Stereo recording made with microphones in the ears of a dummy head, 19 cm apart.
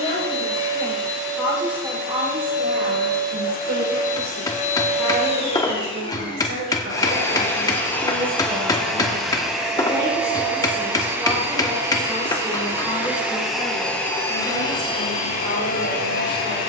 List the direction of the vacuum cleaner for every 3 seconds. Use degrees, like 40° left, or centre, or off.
60° left, 40° left, 10° left, 10° right, centre, 40° left.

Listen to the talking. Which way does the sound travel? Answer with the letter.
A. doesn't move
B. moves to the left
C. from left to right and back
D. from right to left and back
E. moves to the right
C.